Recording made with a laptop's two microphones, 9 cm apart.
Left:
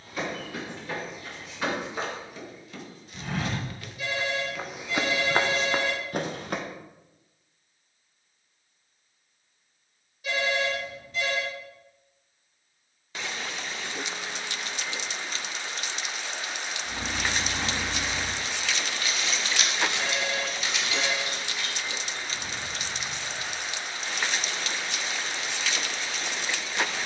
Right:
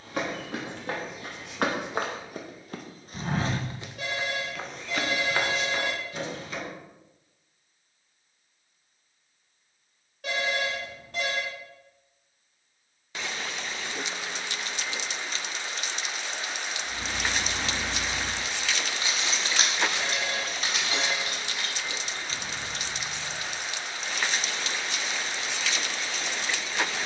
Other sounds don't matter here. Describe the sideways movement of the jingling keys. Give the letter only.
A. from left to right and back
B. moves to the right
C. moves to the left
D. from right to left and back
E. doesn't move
B.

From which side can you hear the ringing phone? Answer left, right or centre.
right.